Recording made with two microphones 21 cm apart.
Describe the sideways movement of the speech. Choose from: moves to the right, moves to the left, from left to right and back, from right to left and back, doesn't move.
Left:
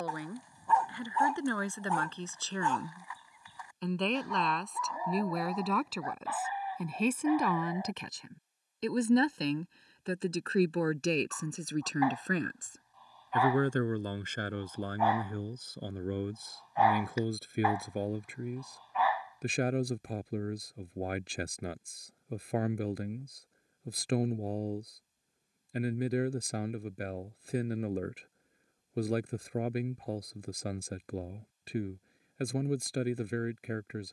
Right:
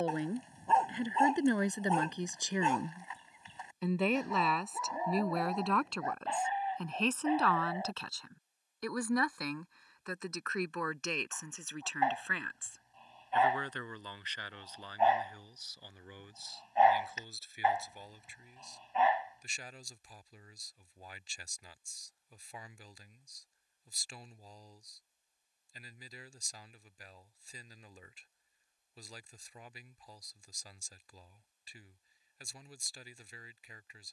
moves to the left.